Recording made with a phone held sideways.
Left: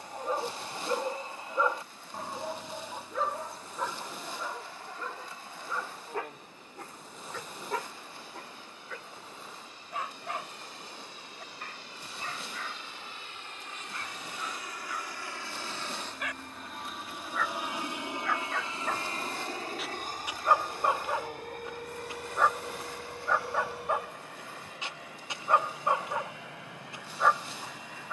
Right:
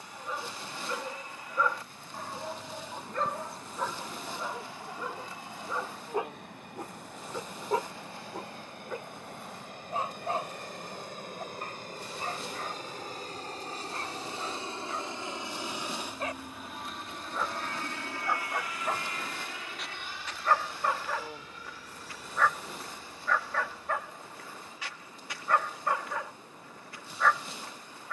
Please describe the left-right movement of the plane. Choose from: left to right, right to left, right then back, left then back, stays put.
right to left.